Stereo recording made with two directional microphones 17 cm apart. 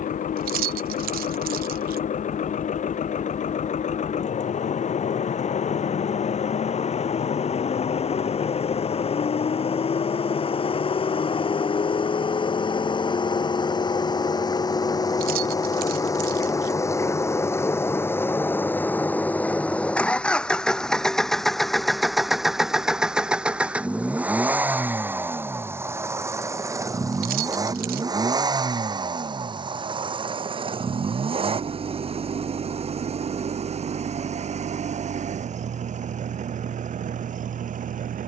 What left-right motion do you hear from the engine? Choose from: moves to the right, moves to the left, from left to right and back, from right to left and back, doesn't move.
moves to the right.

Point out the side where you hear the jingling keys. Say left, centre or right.
right.